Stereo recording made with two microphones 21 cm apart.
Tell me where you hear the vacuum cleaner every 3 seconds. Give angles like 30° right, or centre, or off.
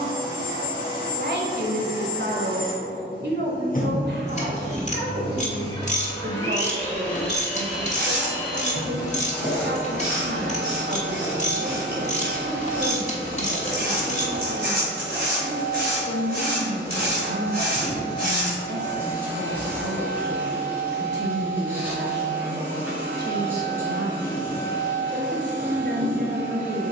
50° left, 30° left, 10° left, 10° right, 10° right, 10° right, 10° right, 10° right, 10° right.